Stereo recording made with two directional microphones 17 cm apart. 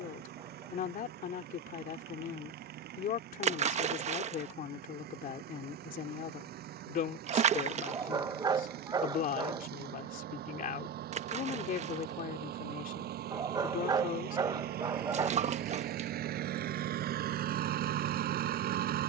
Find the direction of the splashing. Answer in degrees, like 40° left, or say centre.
40° right.